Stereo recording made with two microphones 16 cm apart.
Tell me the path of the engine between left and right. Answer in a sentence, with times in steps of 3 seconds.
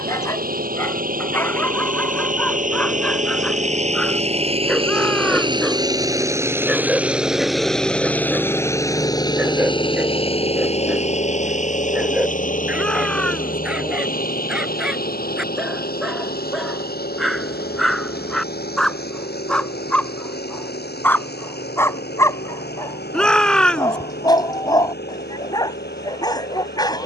You can hear the engine on the right from 0 s, in the centre from 6 s and on the left from 9 s.